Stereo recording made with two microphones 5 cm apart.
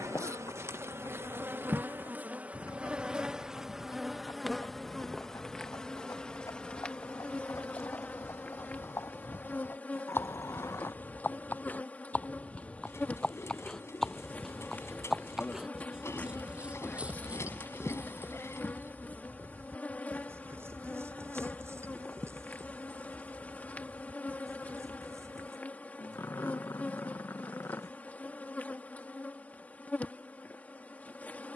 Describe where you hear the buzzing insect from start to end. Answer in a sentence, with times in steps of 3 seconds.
In this clip you hear the buzzing insect on the right from 0 s, in the centre from 3 s and on the left from 6 s.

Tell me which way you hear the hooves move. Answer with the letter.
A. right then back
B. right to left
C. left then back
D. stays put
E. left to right
E.